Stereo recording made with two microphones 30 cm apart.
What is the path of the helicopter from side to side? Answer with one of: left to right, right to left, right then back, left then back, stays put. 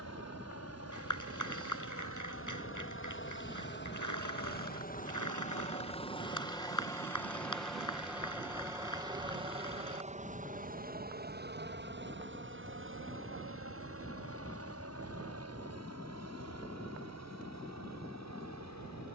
left to right.